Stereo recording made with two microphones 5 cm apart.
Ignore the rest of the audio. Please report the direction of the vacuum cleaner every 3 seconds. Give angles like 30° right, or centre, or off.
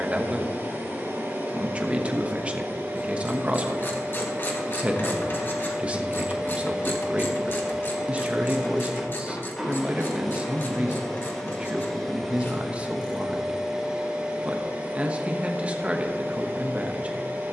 40° right, 30° right, 10° right, centre, 10° right, 40° right.